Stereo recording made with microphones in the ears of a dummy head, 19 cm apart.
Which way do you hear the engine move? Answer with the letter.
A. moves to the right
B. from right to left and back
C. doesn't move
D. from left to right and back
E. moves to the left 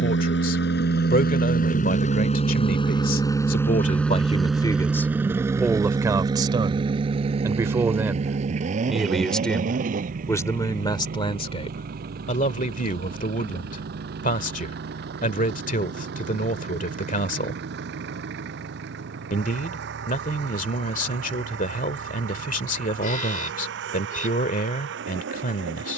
A.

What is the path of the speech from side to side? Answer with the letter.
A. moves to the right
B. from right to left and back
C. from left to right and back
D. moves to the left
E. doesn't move
C.